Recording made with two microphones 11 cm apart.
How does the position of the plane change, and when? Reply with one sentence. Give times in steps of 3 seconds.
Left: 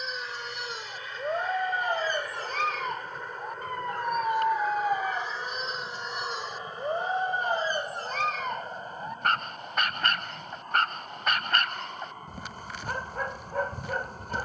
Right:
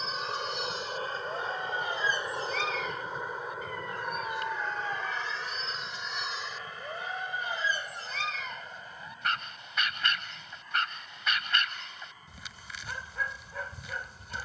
In this clip you hear the plane on the right from 0 s, in the centre from 3 s and on the left from 6 s.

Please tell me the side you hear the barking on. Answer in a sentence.
You can hear the barking on the left.